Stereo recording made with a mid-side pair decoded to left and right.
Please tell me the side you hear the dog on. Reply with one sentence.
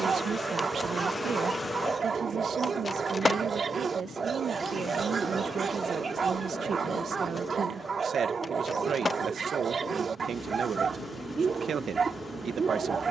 You can hear the dog on the right.